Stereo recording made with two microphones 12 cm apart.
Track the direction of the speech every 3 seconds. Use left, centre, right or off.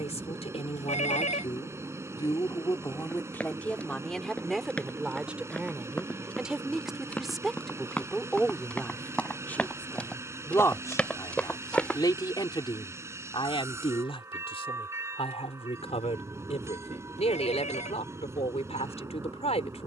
left, centre, centre, left, left, left, left.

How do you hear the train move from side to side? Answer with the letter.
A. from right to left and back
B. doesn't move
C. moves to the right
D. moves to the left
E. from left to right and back
B.